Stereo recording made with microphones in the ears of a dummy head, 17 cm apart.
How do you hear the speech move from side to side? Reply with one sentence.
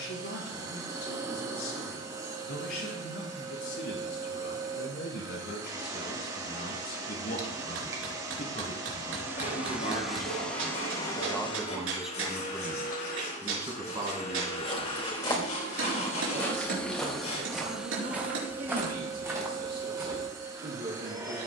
In this clip you hear the speech go from the left side to the right.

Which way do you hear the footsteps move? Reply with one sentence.
In this clip you hear the footsteps travel towards the right.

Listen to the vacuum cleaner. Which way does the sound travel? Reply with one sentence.
In this clip you hear the vacuum cleaner go left and come back.